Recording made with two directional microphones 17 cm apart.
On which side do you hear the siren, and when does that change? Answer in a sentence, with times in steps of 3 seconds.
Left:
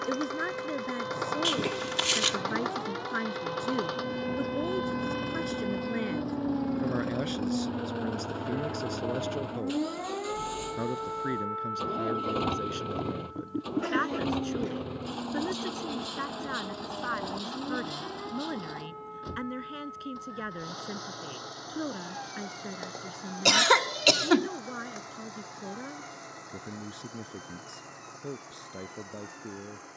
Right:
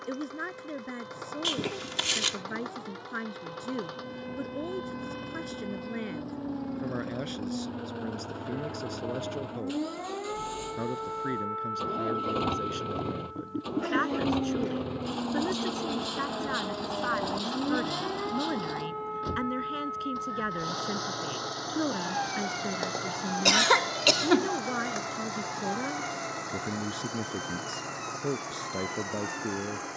In this clip you hear the siren on the left from 0 s, in the centre from 9 s and on the right from 15 s.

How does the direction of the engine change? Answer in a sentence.
You can hear the engine move from left to right.